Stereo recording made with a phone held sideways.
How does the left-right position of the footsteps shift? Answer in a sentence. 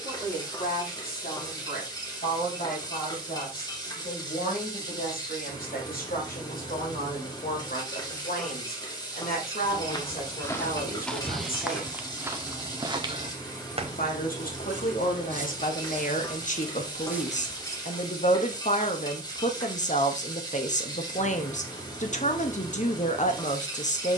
In this clip you hear the footsteps move from left to right and back again.